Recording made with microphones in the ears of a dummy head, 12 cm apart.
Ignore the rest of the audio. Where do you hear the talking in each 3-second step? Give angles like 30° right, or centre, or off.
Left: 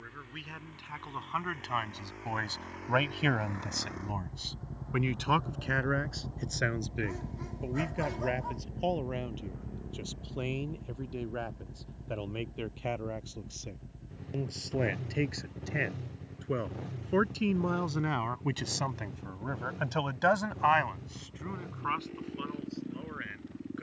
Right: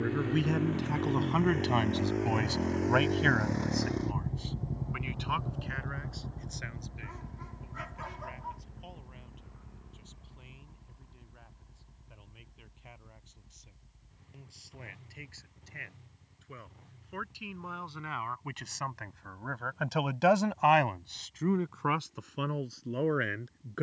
40° right, 40° left, 70° left, 80° left, 80° left, 70° left, 10° left, 60° right.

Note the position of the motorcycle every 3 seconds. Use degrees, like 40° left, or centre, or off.
60° right, 20° right, 30° left, 50° left, 60° left, 70° left, 70° left, 70° left.